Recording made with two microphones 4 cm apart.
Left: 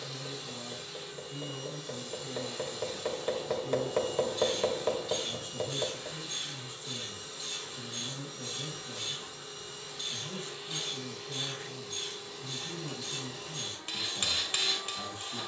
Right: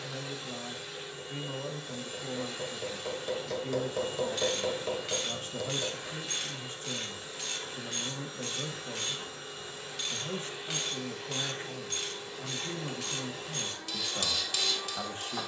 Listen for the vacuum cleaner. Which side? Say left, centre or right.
right.